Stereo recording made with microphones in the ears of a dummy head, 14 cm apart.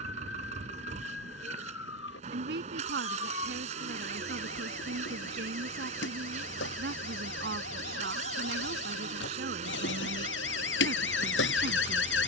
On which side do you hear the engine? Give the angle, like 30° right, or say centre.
40° right.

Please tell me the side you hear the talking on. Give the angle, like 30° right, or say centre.
80° right.